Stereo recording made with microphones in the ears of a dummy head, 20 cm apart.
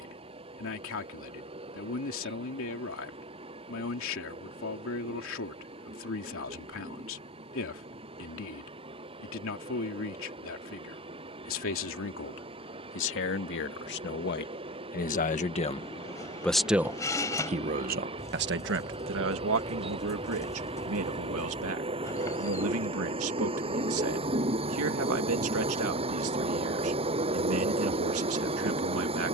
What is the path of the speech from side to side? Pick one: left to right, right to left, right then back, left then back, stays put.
left to right.